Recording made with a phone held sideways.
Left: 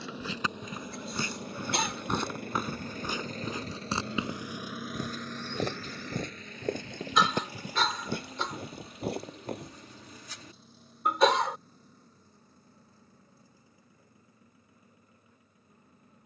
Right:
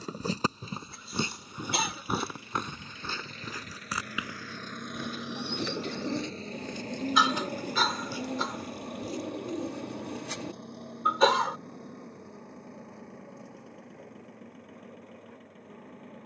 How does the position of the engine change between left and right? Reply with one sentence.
You can hear the engine travel towards the right.